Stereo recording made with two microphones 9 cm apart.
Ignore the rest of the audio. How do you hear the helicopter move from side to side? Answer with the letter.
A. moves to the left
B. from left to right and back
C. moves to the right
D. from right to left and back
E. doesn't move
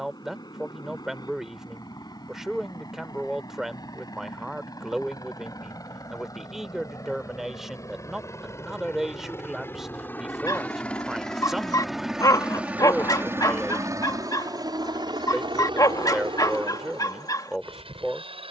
C.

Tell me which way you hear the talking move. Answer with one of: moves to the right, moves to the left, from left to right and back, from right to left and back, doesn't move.
doesn't move.